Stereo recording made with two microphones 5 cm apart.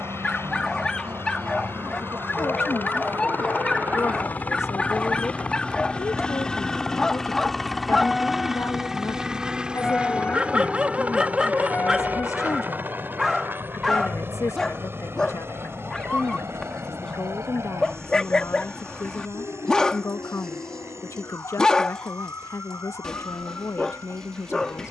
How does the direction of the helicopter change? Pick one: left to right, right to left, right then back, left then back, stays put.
left to right.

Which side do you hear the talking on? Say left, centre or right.
left.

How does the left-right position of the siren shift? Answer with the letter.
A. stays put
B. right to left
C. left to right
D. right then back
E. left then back
B.